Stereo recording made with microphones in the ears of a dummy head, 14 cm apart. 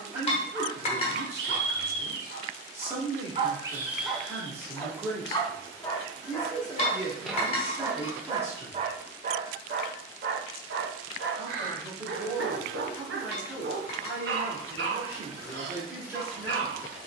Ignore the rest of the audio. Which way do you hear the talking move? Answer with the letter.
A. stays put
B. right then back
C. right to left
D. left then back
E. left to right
A.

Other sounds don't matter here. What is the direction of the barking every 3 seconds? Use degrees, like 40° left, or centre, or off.
70° right, centre, 10° right, 70° right, 70° right, 70° right.